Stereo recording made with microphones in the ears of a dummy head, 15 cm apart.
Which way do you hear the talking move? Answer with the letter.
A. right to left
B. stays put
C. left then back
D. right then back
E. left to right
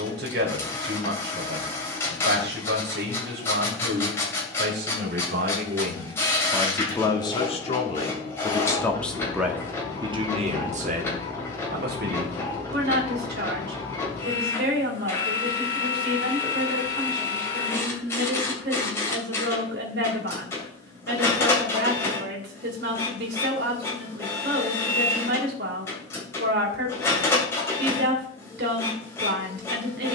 C.